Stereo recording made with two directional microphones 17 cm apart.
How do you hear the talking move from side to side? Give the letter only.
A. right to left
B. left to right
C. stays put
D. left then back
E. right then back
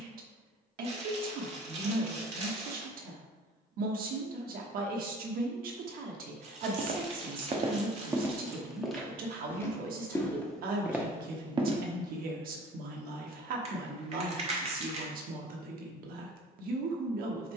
C.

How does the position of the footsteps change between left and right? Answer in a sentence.
In this clip you hear the footsteps go left and come back.